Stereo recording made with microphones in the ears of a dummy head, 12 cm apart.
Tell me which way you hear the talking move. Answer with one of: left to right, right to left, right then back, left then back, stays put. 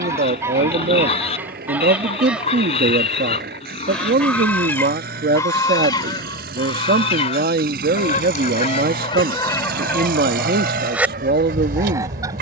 stays put.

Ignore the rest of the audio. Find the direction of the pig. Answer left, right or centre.
left.